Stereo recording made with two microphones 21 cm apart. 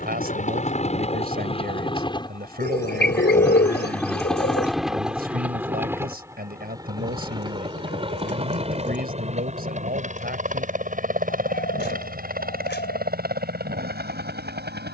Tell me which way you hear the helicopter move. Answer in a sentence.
You can hear the helicopter travel towards the right.